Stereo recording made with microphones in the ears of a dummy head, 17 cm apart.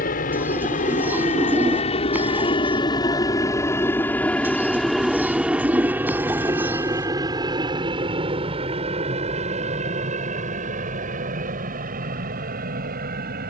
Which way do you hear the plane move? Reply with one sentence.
In this clip you hear the plane move to the right.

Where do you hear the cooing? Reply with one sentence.
You can hear the cooing in the centre.